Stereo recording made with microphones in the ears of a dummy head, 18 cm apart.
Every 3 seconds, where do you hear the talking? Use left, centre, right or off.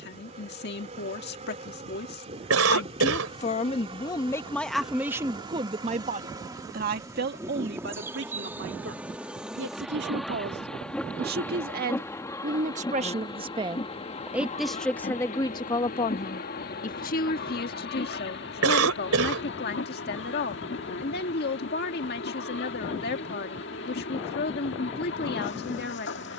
left, centre, right, right, right, left, left, left, left.